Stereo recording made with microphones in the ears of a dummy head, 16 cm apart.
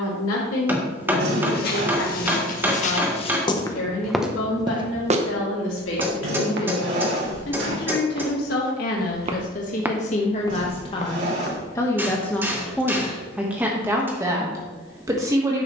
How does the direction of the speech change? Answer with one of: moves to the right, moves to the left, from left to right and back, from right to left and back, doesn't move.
moves to the right.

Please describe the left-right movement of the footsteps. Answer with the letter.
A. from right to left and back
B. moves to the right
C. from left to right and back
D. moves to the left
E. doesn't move
C.